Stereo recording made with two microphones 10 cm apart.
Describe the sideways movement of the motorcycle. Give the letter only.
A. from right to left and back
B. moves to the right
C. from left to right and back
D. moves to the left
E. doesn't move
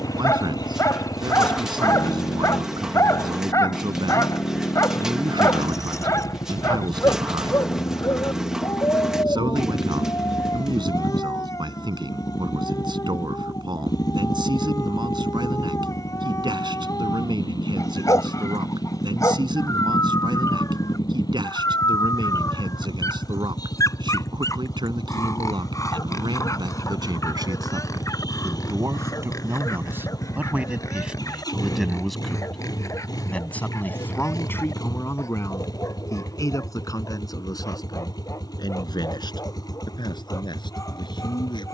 E.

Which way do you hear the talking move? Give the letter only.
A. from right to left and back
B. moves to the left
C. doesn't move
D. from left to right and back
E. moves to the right
B.